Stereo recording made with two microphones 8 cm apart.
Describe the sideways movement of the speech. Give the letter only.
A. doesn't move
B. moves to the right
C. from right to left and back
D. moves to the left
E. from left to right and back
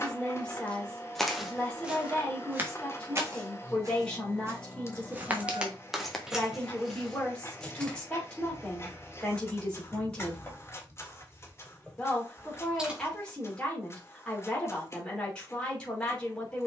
A.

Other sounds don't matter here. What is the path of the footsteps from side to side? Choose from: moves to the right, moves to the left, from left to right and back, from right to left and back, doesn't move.
from left to right and back.